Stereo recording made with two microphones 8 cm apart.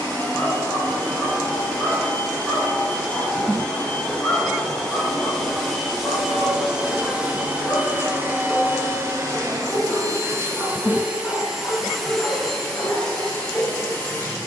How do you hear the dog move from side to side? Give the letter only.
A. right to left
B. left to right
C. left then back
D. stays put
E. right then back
D.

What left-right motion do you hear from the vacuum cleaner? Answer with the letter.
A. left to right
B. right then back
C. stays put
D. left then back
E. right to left
B.